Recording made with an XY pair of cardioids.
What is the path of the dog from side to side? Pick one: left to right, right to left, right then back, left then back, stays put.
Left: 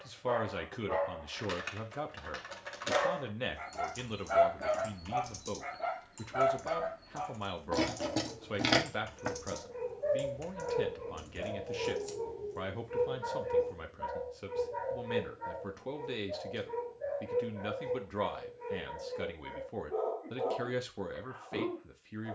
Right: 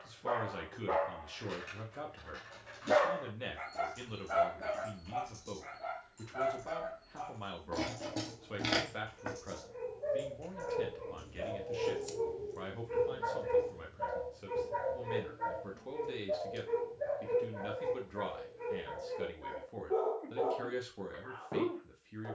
left then back.